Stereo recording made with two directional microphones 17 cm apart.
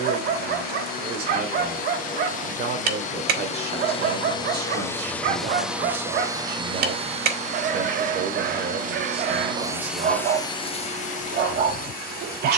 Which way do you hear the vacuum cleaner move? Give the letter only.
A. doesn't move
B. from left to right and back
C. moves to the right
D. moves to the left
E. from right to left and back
B.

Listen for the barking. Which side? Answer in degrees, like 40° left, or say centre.
60° right.